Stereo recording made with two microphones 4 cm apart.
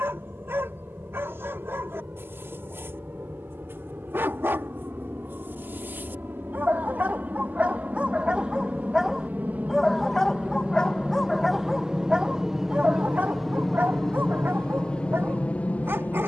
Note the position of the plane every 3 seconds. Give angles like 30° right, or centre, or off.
70° right, 60° right, 50° right, 30° right, centre, 30° left.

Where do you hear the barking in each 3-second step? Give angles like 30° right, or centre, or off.
70° right, 60° right, 30° right, 10° left, 40° right, 60° right.